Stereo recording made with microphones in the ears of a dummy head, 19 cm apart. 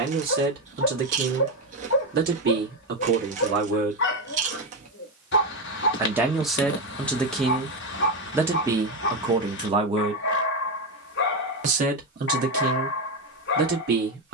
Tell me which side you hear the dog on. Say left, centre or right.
left.